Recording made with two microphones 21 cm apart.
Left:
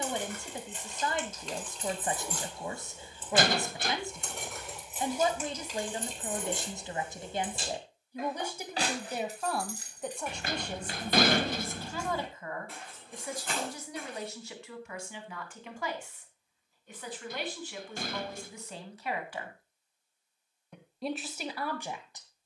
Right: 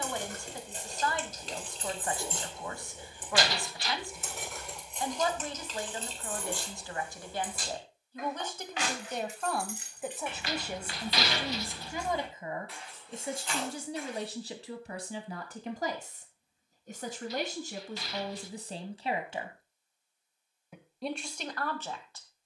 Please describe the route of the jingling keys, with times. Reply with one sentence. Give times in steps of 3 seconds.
You can hear the jingling keys on the right from 0 s, in the centre from 3 s, on the left from 6 s and not at all from 15 s.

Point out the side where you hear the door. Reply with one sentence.
You can hear the door on the left.